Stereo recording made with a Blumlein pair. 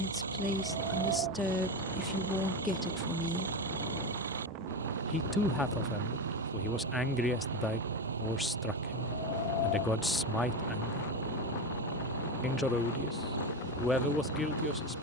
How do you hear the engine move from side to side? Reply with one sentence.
You can hear the engine stay put.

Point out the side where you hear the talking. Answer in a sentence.
In this clip you hear the talking in the centre.